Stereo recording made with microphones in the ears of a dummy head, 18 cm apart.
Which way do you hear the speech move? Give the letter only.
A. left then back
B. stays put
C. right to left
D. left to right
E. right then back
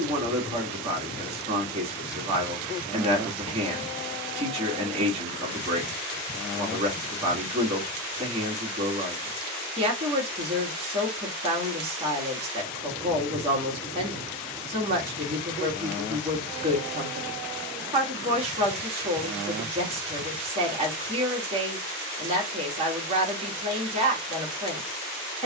B.